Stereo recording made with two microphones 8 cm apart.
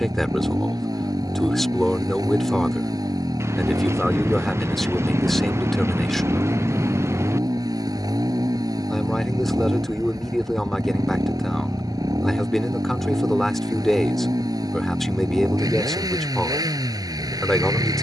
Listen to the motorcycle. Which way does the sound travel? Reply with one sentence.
In this clip you hear the motorcycle stay put.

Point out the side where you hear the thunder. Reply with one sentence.
In this clip you hear the thunder on the right.